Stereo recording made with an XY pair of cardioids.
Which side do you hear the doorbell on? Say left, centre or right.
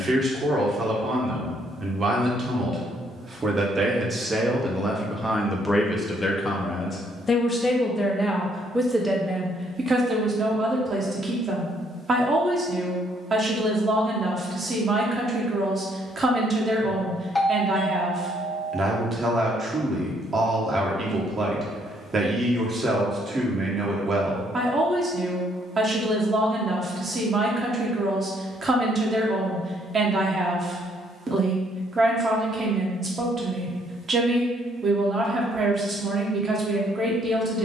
centre.